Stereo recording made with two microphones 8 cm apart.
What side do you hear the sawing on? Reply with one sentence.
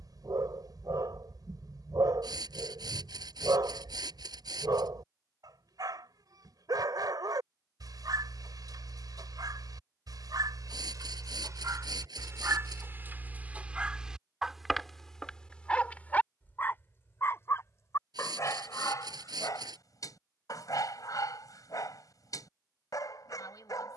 You can hear the sawing on the right.